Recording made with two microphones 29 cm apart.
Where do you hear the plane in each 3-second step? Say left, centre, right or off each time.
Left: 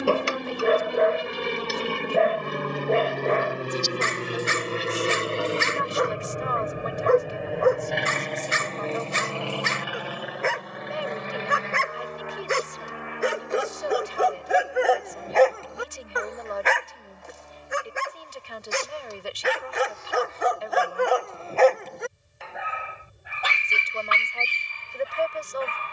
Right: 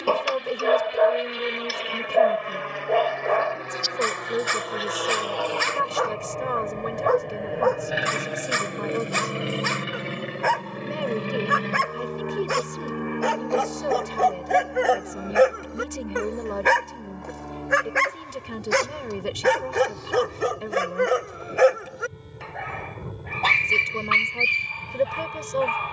left, left, centre, right, right, right, right, right, right.